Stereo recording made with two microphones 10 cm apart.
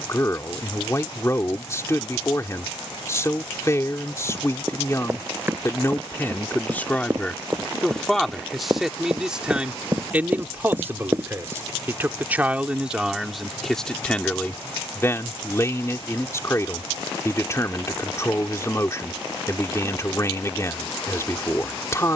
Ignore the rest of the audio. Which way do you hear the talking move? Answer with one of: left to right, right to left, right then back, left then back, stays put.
right then back.